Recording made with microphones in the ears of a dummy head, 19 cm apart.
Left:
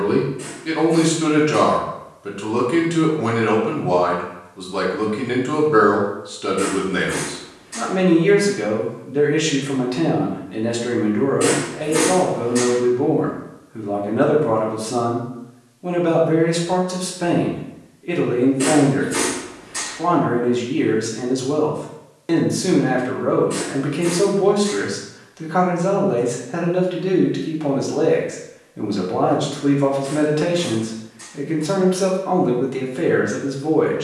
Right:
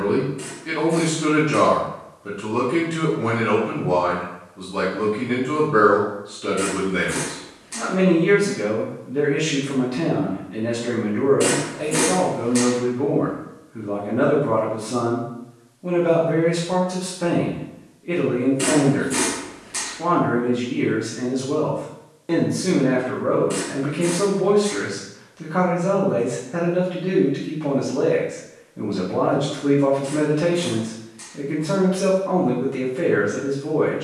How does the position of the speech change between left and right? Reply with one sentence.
In this clip you hear the speech stay put.